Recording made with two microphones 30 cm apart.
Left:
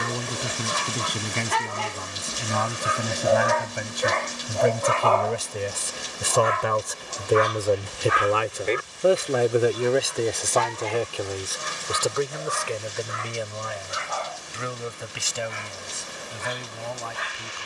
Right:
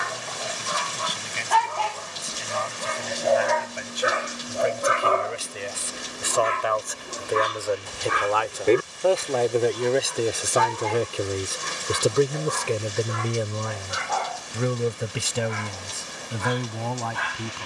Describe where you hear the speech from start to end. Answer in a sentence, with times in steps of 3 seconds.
You can hear the speech on the left from 0 s, in the centre from 9 s and on the right from 12 s.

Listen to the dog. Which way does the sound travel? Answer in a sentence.
You can hear the dog go from the left side to the right.